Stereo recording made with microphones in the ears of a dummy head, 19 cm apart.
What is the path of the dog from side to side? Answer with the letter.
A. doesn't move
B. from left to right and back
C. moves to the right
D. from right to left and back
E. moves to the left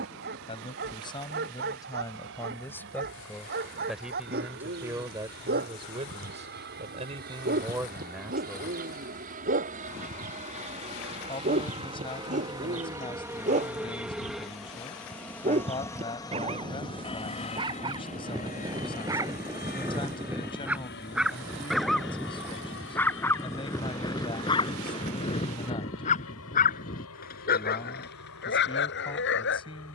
E.